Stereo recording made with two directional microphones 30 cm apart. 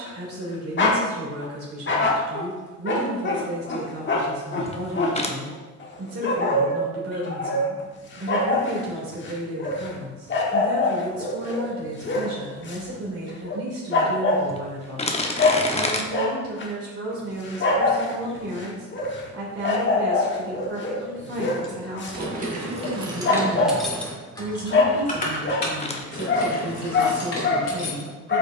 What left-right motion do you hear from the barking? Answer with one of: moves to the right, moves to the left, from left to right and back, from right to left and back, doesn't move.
doesn't move.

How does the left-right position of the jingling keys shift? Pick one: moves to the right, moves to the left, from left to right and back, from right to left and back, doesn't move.
moves to the left.